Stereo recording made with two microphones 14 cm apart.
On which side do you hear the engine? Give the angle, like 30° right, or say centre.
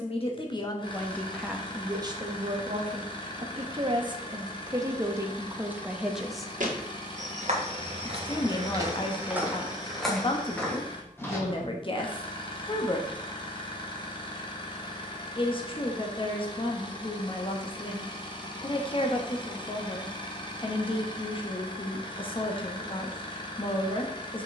30° left.